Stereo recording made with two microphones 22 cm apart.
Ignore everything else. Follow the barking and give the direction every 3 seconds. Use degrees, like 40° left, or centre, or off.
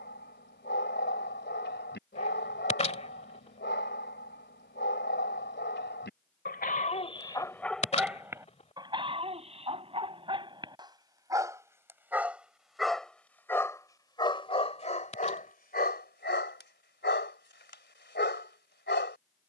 50° left, 50° left, 10° left, 20° right, 10° left, 50° left, 50° left.